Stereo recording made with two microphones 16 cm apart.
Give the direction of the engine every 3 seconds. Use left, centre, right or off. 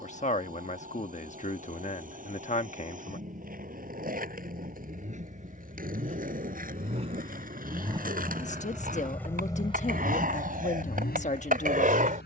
right, right, right, left.